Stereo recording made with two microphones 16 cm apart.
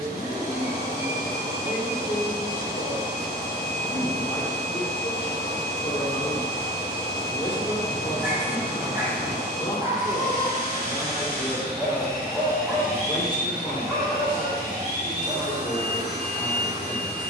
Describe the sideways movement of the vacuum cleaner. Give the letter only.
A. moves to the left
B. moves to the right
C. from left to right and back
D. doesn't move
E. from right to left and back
D.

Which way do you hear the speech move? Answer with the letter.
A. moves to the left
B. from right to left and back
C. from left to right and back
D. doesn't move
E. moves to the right
D.